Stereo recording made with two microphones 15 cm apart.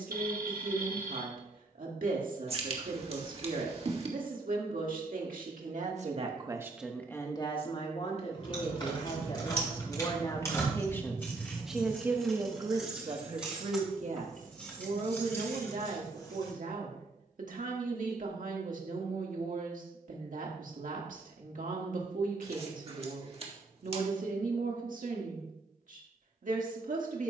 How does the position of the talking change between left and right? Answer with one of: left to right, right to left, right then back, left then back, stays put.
left then back.